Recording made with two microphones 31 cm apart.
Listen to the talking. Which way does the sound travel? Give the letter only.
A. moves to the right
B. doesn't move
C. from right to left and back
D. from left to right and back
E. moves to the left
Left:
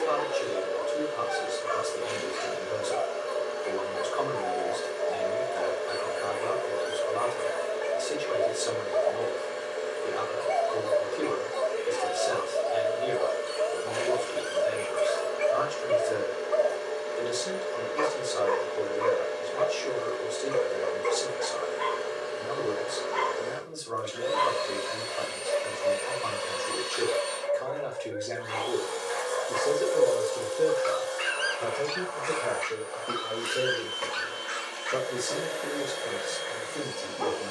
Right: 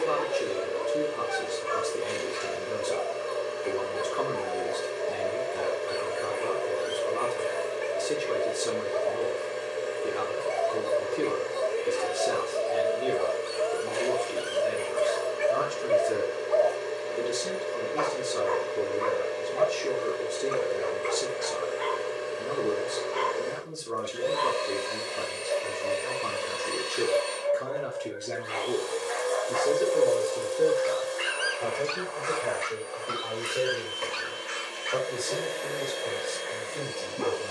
E.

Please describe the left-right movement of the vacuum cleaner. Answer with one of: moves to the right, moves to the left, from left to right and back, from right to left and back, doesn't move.
doesn't move.